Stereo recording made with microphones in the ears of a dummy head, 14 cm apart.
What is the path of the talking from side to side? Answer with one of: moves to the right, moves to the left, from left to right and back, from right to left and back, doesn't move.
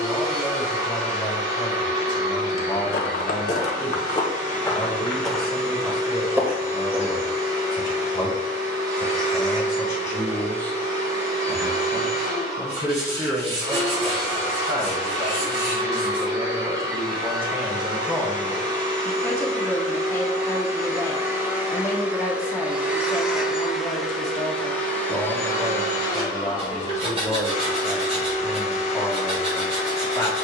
from left to right and back.